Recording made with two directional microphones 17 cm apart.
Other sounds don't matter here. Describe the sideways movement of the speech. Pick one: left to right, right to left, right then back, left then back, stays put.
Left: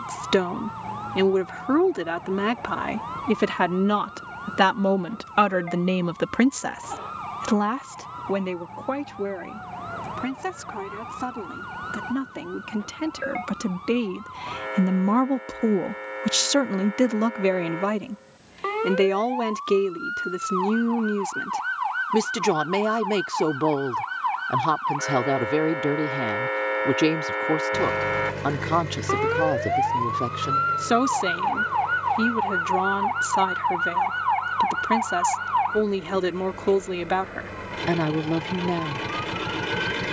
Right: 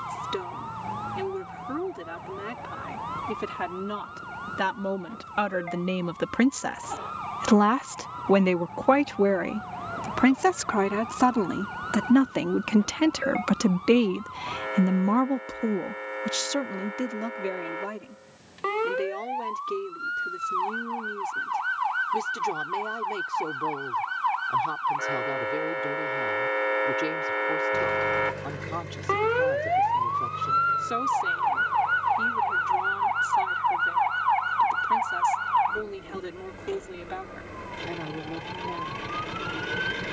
right then back.